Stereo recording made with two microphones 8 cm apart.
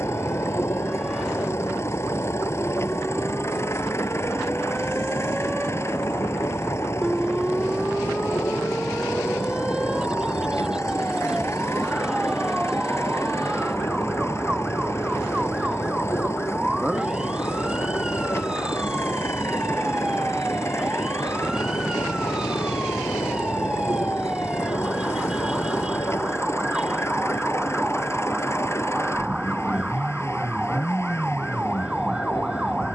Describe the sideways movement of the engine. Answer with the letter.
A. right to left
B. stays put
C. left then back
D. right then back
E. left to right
B.